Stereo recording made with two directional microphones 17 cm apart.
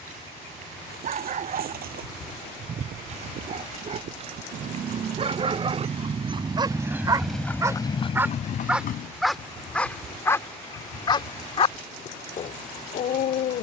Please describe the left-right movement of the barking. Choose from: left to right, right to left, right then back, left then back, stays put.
right to left.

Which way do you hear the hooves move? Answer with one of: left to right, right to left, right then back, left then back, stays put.
right to left.